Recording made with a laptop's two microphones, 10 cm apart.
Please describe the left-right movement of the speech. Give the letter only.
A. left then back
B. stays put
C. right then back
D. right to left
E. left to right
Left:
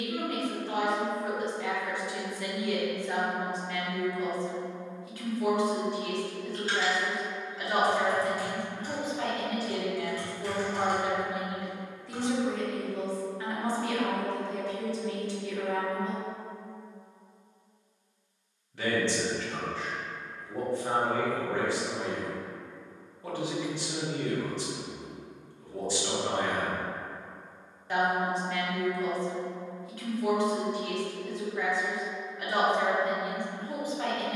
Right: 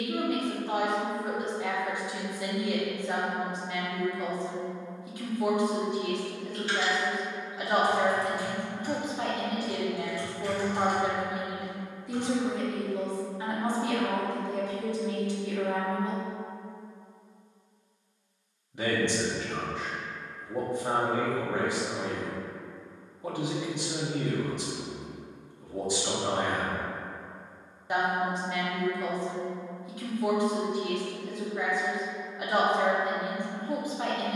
B.